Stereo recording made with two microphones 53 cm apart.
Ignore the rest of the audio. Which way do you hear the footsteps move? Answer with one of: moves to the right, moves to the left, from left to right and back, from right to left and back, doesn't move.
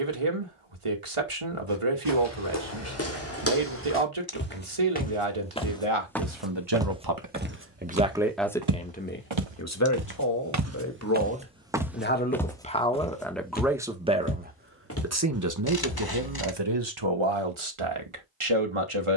from left to right and back.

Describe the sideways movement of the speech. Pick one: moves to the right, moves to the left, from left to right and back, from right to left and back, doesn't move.
from right to left and back.